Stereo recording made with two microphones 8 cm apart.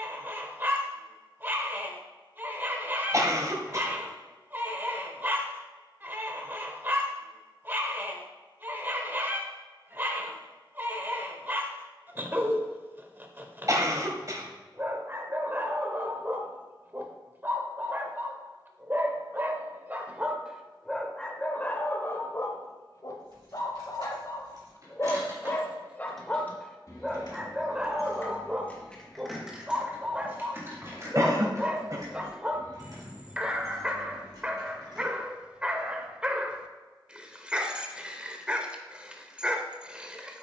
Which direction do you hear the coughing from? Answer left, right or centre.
right.